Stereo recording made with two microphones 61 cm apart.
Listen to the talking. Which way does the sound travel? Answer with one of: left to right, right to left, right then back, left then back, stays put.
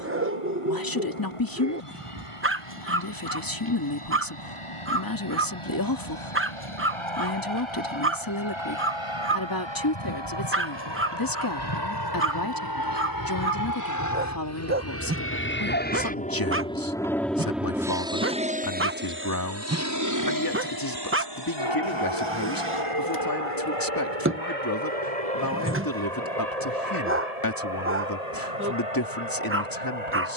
stays put.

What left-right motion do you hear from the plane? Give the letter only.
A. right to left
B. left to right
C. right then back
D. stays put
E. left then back
B.